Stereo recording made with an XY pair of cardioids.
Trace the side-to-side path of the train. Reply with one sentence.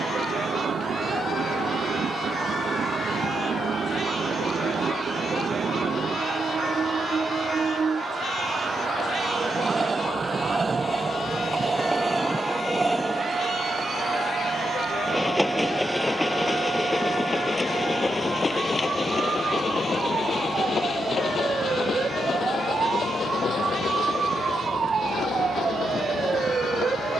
In this clip you hear the train move from right to left.